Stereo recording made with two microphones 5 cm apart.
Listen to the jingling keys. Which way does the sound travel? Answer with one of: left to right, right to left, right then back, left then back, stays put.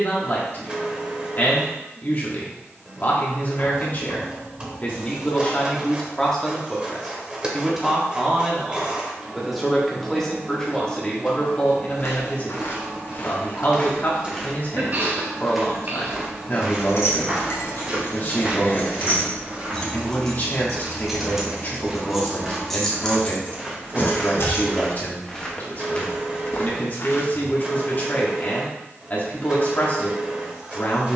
right then back.